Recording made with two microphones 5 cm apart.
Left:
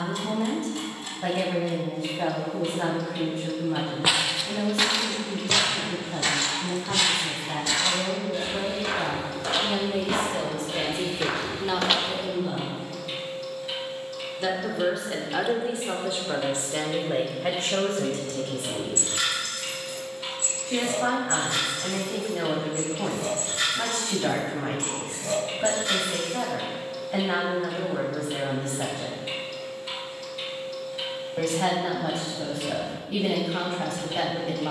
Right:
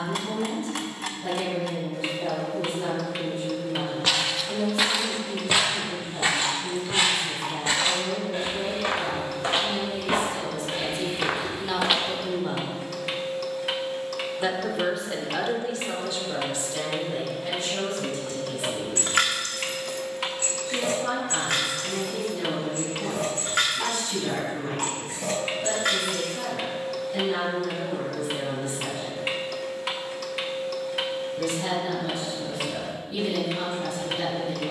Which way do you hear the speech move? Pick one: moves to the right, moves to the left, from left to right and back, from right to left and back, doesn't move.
from left to right and back.